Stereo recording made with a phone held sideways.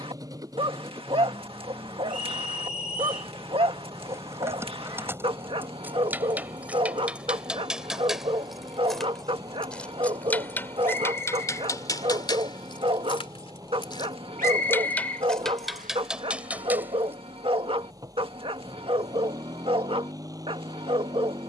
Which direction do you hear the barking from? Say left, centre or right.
right.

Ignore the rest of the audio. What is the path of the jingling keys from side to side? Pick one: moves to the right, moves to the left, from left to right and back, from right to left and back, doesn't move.
from right to left and back.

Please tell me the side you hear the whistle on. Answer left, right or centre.
right.